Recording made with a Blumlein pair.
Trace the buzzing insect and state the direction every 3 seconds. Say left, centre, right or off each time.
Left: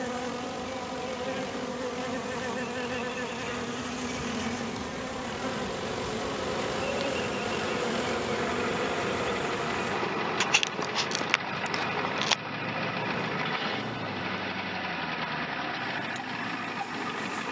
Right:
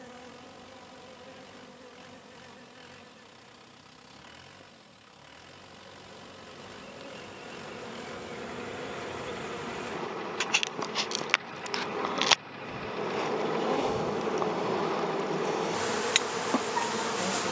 left, left, left, centre, right, right.